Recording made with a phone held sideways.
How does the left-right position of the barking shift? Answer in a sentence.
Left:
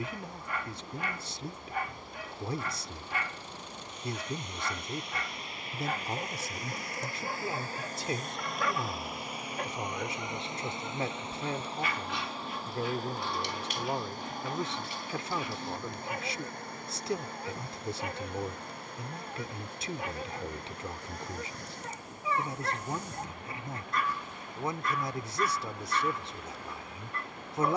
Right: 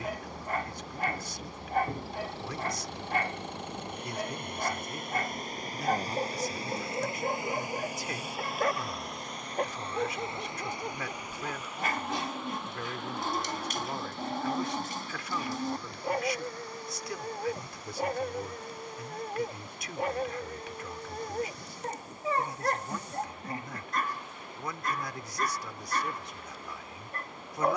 In this clip you hear the barking stay in one place.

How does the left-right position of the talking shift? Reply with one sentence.
You can hear the talking stay put.